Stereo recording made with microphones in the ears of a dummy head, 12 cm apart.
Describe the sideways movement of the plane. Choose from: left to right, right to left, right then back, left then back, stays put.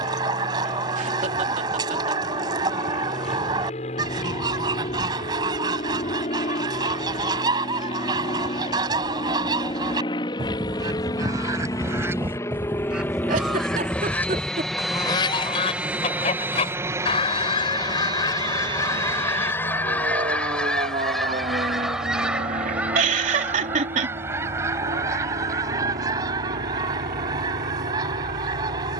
left to right.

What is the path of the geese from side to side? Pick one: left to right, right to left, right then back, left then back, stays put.
left then back.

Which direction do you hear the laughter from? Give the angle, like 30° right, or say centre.
60° right.